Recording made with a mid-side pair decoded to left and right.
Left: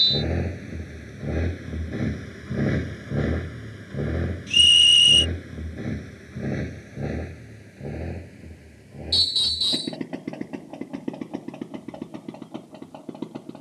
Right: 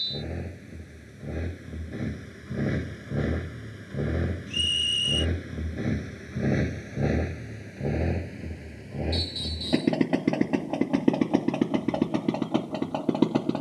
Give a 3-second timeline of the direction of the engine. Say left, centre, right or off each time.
left, centre, right, right, right.